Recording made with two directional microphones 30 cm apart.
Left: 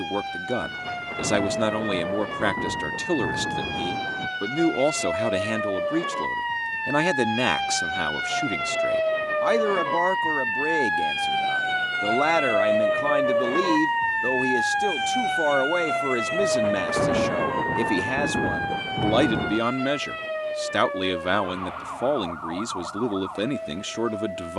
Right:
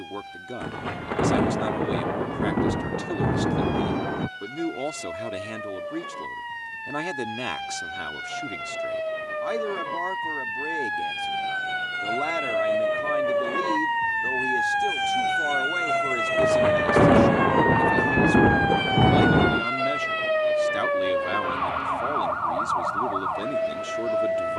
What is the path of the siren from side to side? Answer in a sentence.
In this clip you hear the siren go from the left side to the right.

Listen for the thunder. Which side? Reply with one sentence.
In this clip you hear the thunder on the right.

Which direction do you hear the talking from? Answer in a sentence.
You can hear the talking on the left.